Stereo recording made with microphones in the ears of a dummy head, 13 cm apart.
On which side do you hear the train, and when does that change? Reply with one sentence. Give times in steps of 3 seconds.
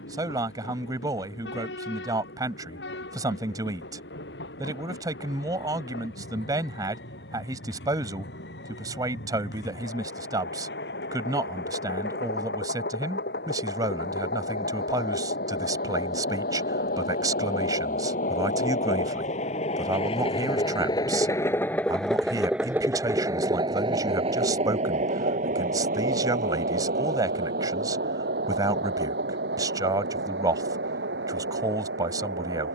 In this clip you hear the train on the left from 0 s, in the centre from 21 s and on the right from 24 s.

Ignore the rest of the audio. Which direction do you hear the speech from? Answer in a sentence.
In this clip you hear the speech on the right.